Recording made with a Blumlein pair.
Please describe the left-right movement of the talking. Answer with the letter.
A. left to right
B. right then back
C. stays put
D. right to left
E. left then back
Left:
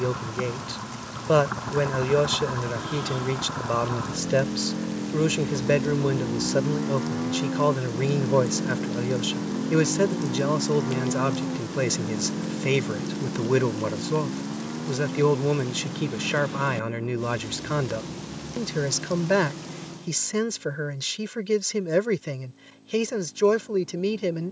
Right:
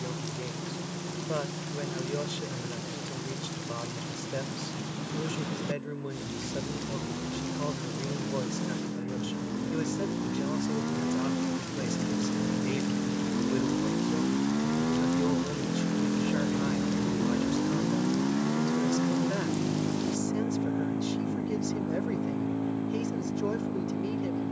C.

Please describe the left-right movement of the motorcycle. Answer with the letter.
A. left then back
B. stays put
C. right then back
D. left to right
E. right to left
D.